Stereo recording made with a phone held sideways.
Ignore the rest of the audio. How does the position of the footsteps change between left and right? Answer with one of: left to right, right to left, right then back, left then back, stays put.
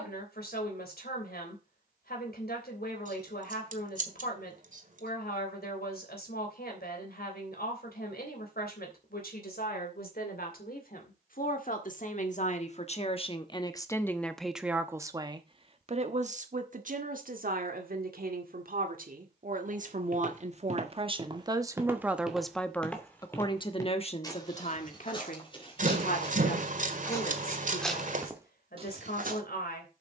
left then back.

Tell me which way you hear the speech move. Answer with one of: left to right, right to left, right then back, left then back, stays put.
right then back.